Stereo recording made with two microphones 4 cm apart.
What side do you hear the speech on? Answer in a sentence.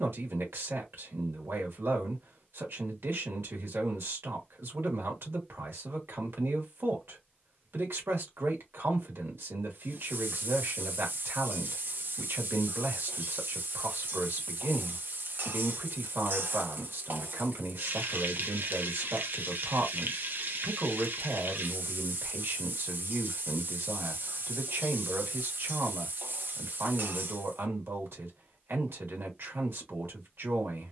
In this clip you hear the speech on the right.